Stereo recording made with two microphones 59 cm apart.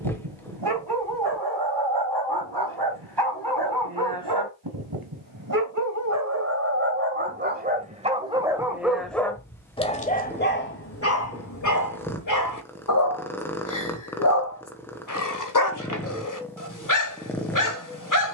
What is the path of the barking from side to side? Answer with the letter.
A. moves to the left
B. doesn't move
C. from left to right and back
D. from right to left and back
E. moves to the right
A.